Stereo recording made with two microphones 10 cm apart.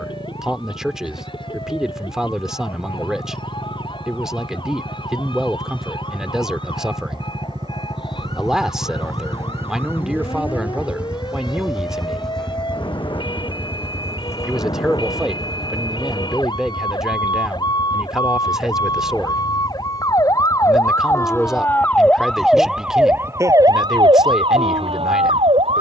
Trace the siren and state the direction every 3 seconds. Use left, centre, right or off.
left, left, left, left, left, left, left, centre, right.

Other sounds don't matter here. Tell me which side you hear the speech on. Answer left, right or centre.
centre.